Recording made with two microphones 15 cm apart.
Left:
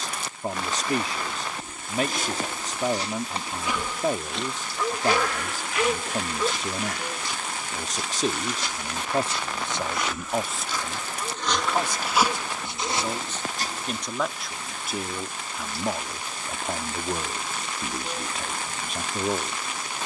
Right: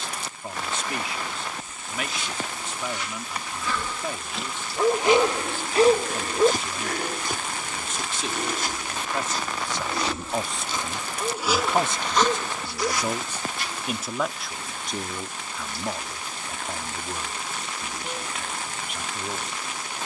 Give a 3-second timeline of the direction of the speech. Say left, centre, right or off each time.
left, left, left, centre, centre, left, left.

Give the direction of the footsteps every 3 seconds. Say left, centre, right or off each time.
left, centre, right, right, left, off, off.